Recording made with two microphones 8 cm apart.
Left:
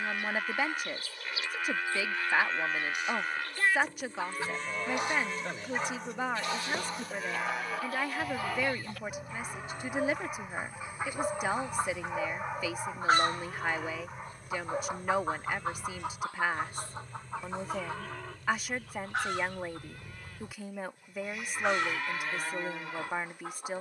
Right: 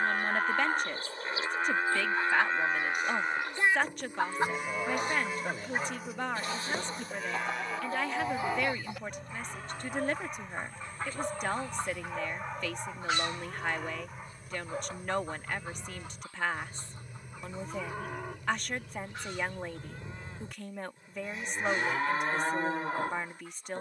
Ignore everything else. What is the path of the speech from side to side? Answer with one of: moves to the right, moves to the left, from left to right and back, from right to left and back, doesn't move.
doesn't move.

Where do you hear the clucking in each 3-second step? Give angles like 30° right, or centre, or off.
50° right, 40° right, 30° right, 10° left, 50° left, 70° left, 80° left, 80° left.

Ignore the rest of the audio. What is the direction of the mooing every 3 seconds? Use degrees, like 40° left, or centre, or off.
30° right, 10° right, centre, 10° left, centre, 10° right, 20° right, 30° right.